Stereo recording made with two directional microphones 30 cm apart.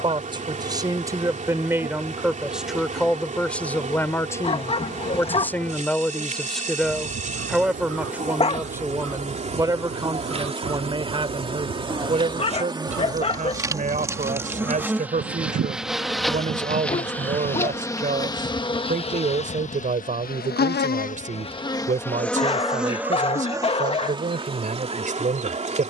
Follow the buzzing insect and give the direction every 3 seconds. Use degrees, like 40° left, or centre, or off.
20° right, 20° right, 20° right, 20° right, 10° right, centre, 20° left, centre, 20° right.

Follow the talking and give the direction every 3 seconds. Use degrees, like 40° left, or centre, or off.
10° right, 10° left, centre, 10° right, 20° right, 30° right, 30° right, 30° right, 30° right.